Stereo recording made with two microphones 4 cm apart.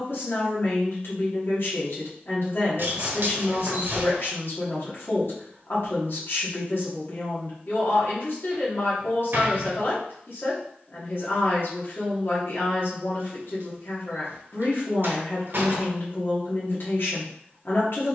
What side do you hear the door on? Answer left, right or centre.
right.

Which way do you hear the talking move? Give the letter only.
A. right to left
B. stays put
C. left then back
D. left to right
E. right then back
B.